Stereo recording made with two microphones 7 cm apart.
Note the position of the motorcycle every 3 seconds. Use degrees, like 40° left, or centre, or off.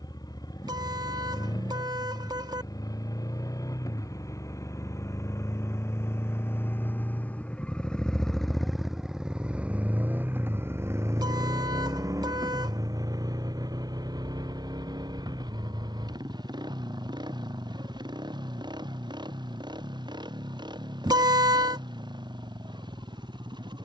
60° left, 50° left, 20° left, 30° right, 60° right, 70° right, 80° right, 80° right.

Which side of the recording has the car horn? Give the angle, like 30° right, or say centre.
60° right.